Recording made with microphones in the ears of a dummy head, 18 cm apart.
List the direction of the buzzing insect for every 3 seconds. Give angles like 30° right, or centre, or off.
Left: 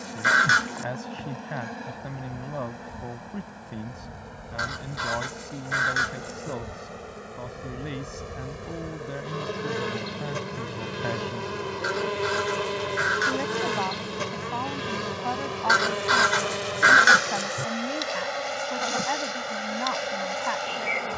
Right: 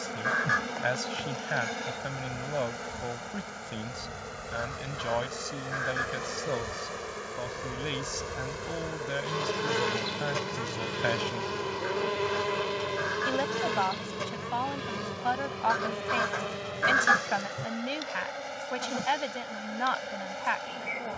70° right, 70° right, 50° right, 30° right, centre, 20° left, 30° left.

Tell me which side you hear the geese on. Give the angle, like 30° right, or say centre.
80° left.